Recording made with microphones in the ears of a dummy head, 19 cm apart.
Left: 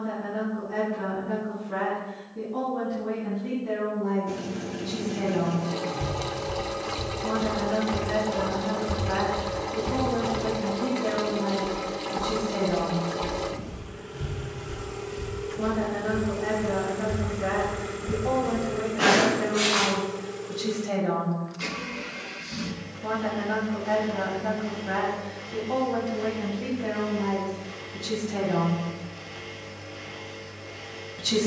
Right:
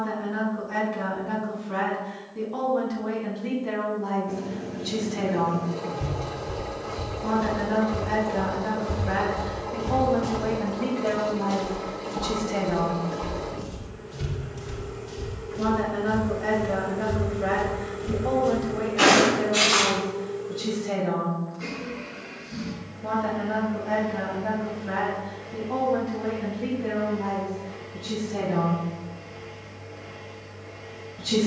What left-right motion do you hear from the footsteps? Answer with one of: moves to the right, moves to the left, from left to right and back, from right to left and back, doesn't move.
moves to the right.